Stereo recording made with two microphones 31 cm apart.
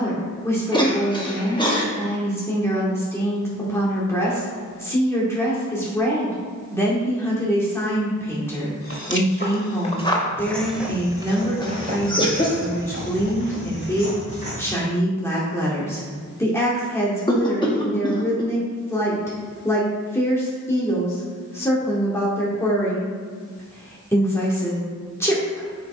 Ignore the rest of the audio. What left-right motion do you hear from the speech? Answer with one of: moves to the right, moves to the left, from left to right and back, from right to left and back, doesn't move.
doesn't move.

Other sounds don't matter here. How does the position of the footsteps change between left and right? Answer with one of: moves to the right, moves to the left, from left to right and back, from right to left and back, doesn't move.
moves to the right.